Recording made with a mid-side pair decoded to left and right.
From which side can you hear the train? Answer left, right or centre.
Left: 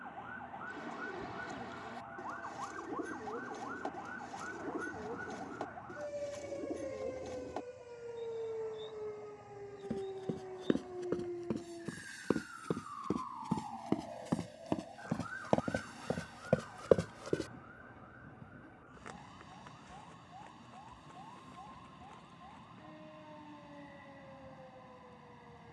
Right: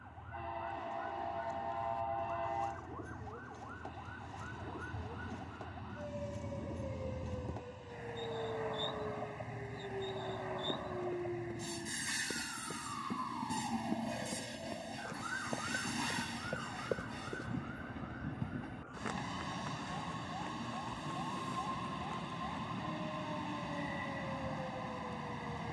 right.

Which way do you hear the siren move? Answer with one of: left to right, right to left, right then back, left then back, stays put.
left to right.